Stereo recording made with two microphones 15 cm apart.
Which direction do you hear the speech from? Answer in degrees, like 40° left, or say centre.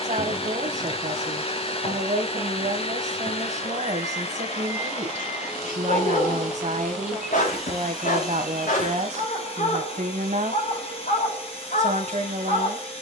50° right.